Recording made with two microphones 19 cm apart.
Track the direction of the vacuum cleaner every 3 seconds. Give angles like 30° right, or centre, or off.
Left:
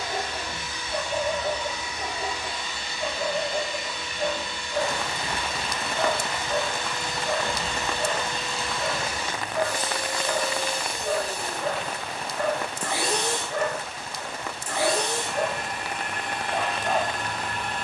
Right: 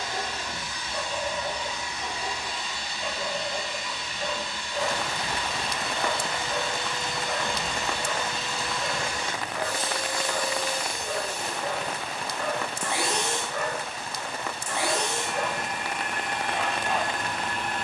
40° right, 40° right, 20° right, 20° left, 30° left, 30° left.